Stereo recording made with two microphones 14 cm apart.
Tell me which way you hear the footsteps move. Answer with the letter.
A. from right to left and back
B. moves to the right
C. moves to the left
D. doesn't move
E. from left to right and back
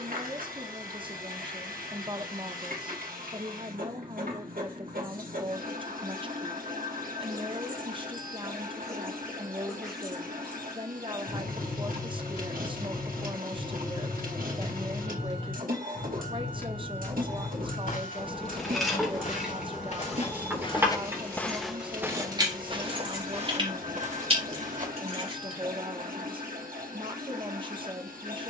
B.